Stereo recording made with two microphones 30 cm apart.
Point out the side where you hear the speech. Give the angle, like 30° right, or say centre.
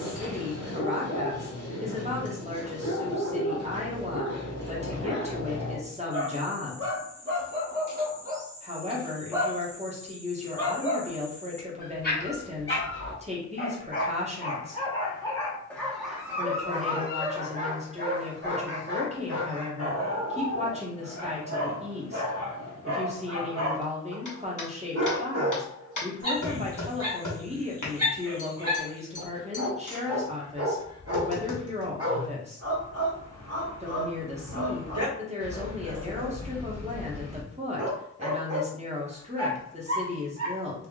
20° right.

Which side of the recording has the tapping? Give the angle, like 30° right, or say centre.
80° left.